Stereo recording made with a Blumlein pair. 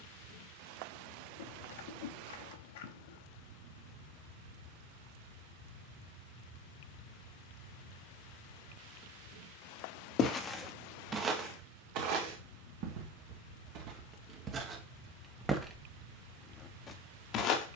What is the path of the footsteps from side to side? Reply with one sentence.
In this clip you hear the footsteps go right and come back.